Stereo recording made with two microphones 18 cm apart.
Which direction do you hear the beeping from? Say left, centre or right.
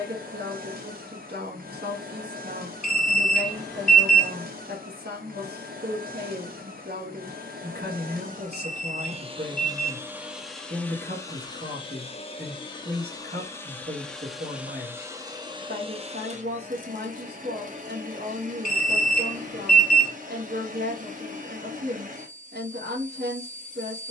centre.